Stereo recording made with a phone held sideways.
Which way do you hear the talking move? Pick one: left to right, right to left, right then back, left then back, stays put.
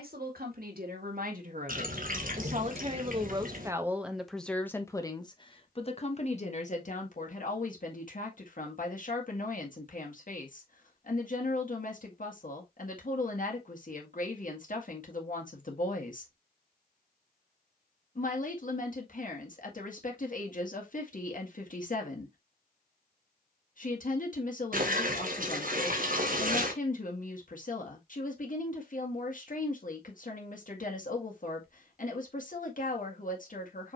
right to left.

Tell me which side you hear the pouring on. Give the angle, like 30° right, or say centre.
60° right.